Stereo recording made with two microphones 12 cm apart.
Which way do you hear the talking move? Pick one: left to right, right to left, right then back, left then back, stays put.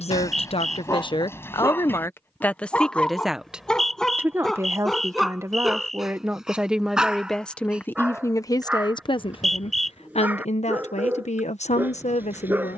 right then back.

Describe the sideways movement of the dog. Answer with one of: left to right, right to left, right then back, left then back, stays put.
left to right.